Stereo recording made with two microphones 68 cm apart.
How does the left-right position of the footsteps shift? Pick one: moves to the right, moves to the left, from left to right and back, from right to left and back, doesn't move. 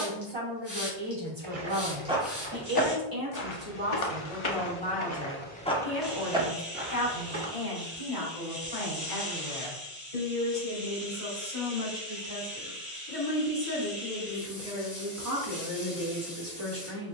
from right to left and back.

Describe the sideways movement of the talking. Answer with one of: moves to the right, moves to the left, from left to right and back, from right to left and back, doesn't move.
from right to left and back.